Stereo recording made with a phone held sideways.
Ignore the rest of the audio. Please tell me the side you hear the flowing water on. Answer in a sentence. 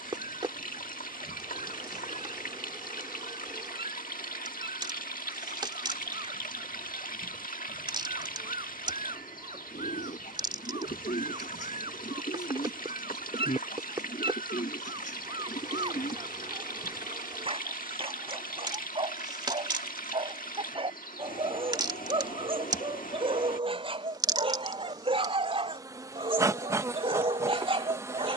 You can hear the flowing water on the left.